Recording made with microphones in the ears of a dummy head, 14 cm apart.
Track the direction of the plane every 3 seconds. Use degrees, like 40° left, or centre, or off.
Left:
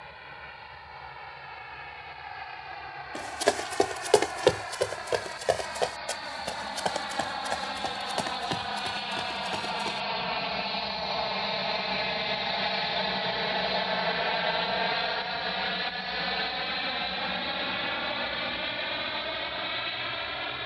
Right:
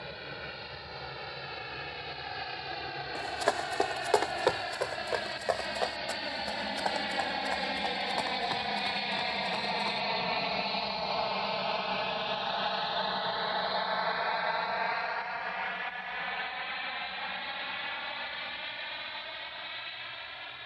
50° right, 40° right, 20° right, centre, 20° left, 50° left, 60° left.